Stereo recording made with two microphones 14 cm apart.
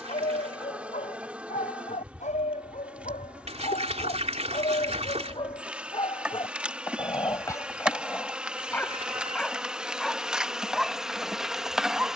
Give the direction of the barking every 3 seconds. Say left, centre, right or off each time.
left, left, left, centre.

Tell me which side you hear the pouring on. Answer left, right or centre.
right.